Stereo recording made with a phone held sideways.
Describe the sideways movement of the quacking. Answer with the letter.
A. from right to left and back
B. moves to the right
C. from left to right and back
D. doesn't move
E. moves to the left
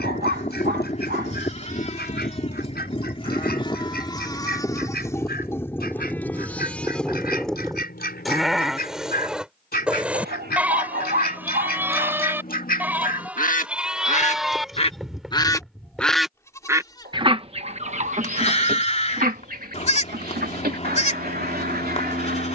B.